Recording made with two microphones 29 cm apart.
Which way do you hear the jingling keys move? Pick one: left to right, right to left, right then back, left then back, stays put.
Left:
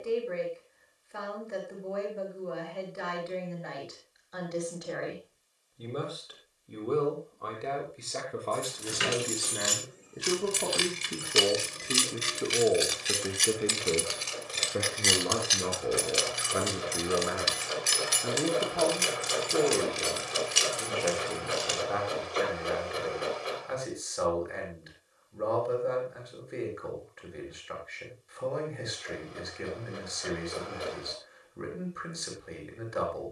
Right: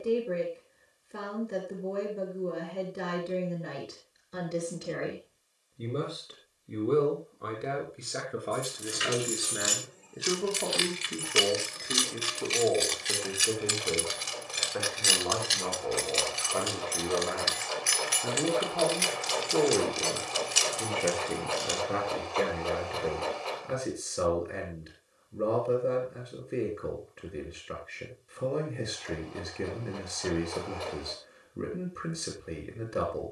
right then back.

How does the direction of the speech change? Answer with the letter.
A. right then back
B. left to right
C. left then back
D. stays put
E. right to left
C.